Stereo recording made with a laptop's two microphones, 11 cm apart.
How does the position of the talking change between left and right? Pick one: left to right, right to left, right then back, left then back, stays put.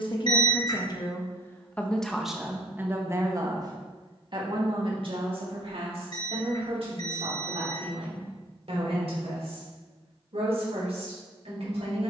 left to right.